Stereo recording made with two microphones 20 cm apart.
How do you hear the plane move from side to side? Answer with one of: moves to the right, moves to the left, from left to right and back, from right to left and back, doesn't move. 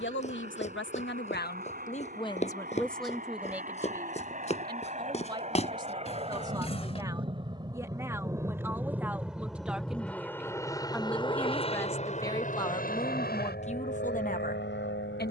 moves to the left.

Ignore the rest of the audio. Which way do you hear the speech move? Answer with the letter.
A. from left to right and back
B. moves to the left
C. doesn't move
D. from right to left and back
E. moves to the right
A.